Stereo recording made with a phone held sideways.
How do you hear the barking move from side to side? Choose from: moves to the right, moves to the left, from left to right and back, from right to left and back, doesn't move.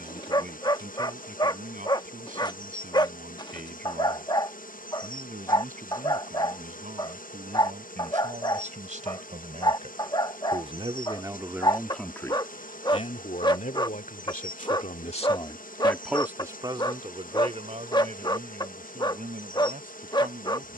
doesn't move.